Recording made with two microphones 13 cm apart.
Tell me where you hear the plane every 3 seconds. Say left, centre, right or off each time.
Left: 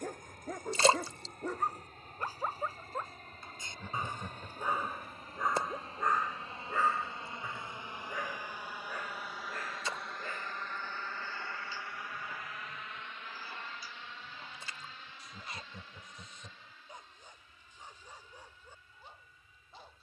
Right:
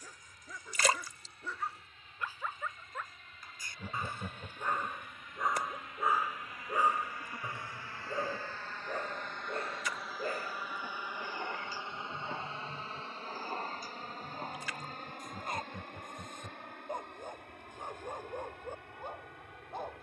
left, left, left, centre, right, right, right.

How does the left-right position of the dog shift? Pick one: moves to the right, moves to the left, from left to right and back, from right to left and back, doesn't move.
moves to the right.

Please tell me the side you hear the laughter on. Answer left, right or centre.
centre.